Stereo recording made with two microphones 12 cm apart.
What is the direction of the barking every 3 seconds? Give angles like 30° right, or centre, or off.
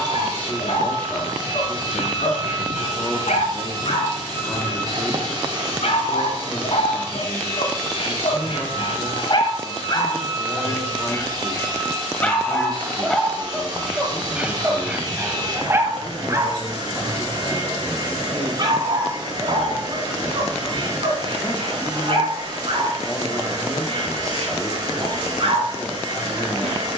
80° left, 70° left, 60° left, 40° left, centre, 20° right, 40° right, 50° right, 60° right.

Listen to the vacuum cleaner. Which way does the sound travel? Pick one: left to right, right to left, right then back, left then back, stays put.
stays put.